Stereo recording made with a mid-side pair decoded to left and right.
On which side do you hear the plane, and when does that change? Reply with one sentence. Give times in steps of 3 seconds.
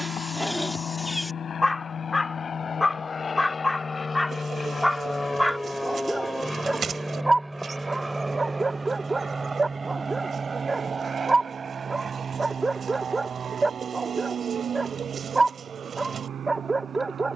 You can hear the plane on the left from 0 s, in the centre from 6 s and on the right from 9 s.